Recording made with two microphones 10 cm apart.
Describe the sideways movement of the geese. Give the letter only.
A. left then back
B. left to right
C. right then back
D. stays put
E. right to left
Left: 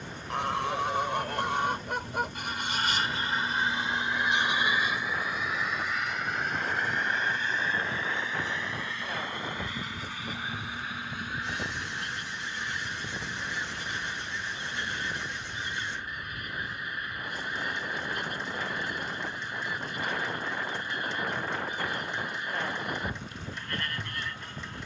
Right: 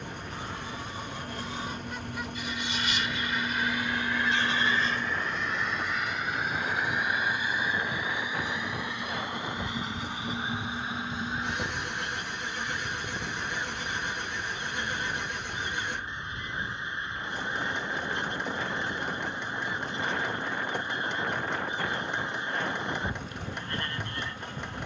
B.